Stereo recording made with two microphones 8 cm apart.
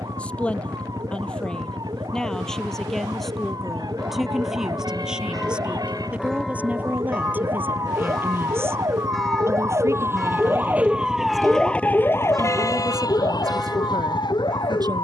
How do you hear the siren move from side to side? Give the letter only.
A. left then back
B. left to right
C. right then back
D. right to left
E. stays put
D.